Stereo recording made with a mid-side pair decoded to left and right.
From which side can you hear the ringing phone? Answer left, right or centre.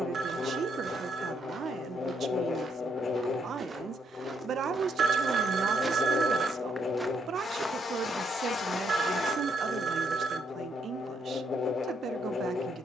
right.